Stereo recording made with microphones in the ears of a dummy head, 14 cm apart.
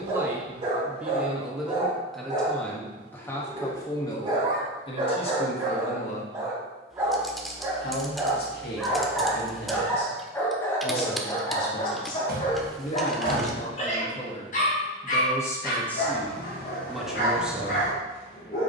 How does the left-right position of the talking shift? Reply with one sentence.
You can hear the talking go left and come back.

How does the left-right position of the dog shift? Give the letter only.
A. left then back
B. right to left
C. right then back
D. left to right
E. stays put
B.